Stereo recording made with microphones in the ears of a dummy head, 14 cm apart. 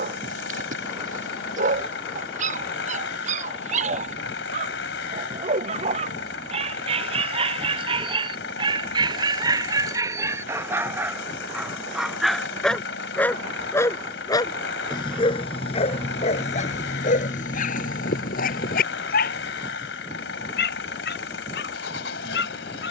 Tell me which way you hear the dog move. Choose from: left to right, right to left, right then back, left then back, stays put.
right to left.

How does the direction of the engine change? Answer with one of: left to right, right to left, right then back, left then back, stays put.
stays put.